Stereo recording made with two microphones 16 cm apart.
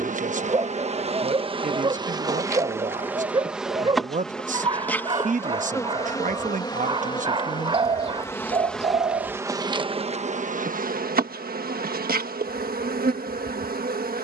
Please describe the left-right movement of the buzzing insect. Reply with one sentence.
In this clip you hear the buzzing insect go left and come back.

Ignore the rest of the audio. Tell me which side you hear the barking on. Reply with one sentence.
In this clip you hear the barking on the right.